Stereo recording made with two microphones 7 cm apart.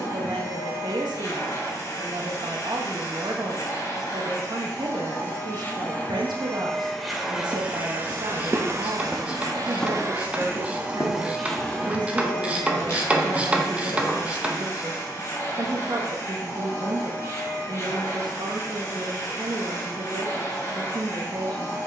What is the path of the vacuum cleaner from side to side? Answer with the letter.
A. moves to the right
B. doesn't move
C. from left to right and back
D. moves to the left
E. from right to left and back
C.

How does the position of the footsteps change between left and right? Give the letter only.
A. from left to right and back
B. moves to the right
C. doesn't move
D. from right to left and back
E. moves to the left
E.